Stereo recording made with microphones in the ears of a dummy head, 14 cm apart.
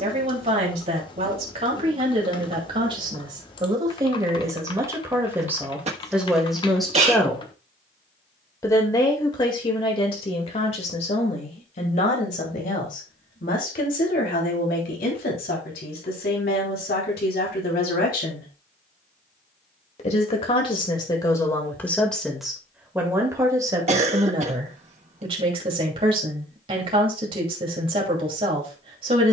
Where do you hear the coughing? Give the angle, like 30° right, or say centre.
50° right.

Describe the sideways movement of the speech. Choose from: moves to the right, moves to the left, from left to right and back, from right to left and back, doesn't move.
from right to left and back.